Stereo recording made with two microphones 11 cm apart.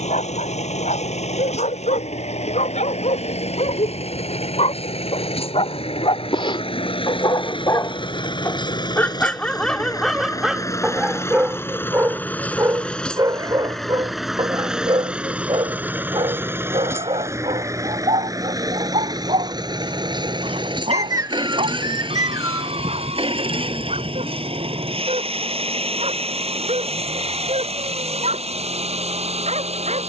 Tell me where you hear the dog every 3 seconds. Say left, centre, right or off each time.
left, left, left, centre, right, right, right, right, right, right.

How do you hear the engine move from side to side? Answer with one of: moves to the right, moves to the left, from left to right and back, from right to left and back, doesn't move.
moves to the right.